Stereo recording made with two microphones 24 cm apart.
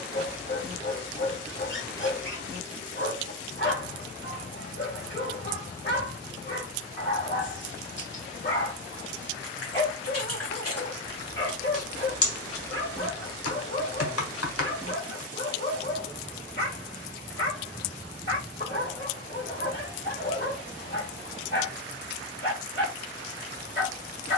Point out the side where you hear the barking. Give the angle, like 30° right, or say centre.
50° left.